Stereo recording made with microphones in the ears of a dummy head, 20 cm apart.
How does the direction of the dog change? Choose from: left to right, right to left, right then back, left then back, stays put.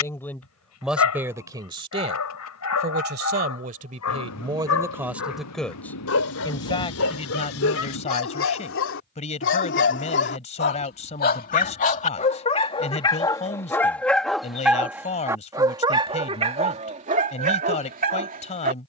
left to right.